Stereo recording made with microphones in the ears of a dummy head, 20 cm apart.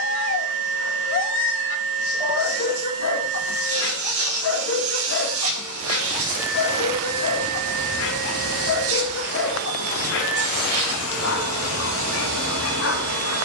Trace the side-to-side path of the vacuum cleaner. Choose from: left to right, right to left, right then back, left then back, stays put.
stays put.